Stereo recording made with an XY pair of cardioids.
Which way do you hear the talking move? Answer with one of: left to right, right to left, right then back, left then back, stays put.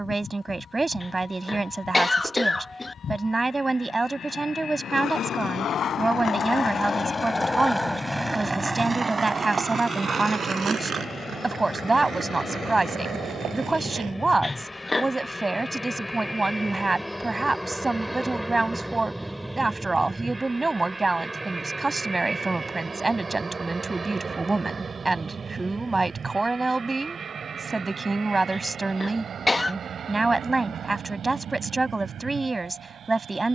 stays put.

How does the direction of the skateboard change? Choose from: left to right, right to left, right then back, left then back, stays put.
left to right.